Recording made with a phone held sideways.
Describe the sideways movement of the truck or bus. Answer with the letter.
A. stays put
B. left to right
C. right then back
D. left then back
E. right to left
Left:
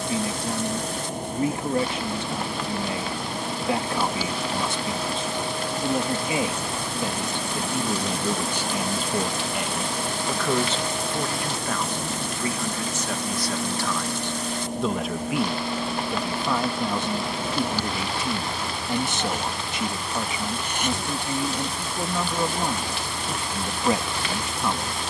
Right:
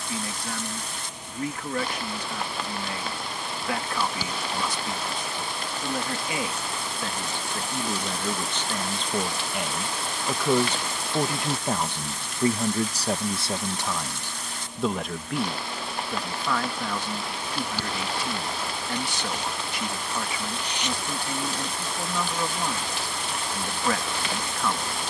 A.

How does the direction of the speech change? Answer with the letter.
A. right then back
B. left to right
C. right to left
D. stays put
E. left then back
A.